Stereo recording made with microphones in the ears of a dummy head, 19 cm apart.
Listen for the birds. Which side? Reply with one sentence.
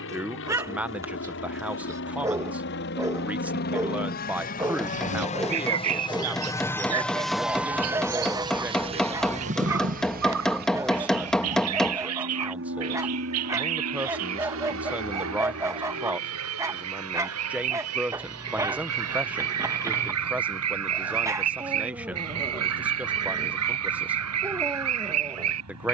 You can hear the birds on the right.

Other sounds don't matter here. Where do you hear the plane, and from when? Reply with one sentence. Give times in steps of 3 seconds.
In this clip you hear the plane on the left from 0 s, in the centre from 6 s and on the right from 9 s.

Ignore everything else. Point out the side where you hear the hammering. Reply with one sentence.
In this clip you hear the hammering in the centre.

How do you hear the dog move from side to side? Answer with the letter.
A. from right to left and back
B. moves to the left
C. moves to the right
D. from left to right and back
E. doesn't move
E.